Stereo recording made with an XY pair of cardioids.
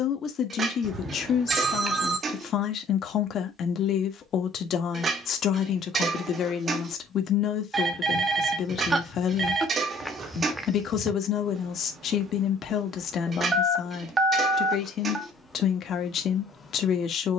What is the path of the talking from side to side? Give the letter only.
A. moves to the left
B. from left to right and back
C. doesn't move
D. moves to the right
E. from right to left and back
C.